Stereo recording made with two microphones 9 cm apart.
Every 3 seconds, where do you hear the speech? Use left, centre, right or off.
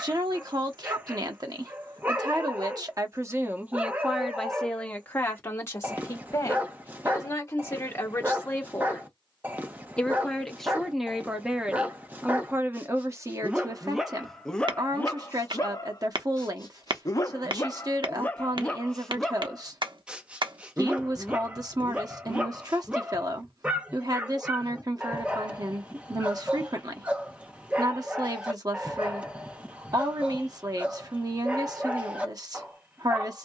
right, centre, left, centre, right, right, right, right, right, right, right.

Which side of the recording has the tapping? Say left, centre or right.
right.